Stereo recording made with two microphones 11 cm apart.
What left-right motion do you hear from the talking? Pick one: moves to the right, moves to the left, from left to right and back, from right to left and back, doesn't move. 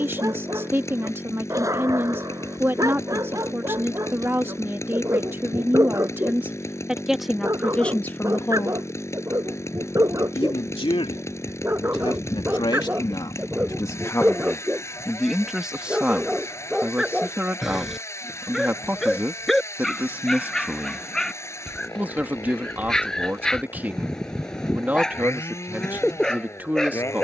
from right to left and back.